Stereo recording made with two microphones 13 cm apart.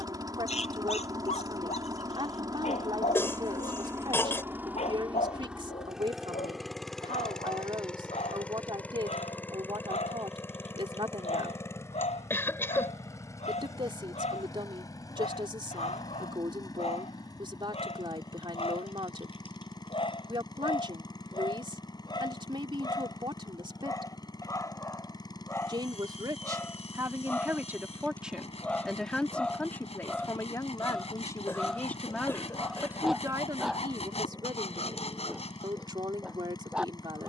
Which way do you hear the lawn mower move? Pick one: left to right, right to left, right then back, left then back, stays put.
right to left.